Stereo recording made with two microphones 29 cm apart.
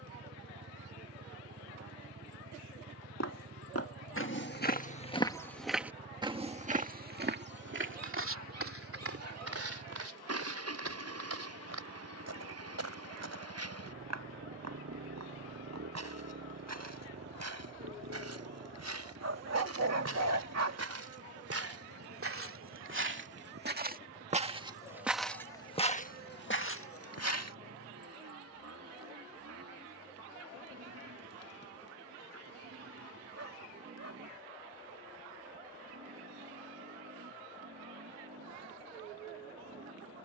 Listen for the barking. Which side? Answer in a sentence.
In this clip you hear the barking on the right.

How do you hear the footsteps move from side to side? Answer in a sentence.
In this clip you hear the footsteps go right and come back.